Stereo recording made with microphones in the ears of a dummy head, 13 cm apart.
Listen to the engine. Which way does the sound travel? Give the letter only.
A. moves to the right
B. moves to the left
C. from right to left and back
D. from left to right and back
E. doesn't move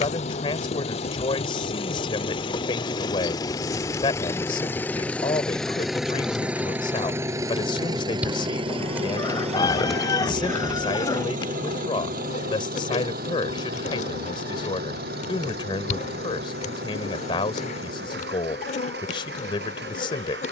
A.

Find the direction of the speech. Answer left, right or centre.
left.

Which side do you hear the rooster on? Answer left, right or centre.
left.